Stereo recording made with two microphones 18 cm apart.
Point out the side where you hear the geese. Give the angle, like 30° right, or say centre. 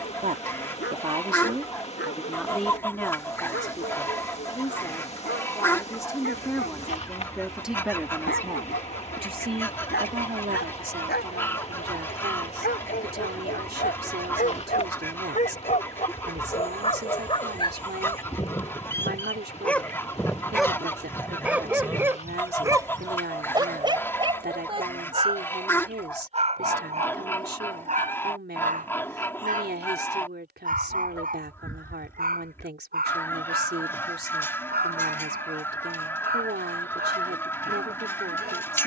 10° left.